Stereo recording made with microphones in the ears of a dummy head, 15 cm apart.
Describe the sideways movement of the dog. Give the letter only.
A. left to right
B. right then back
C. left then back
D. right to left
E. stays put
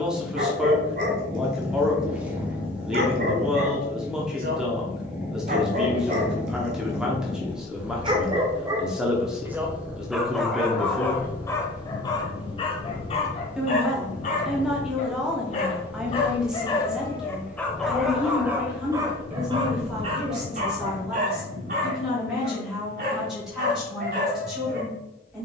C.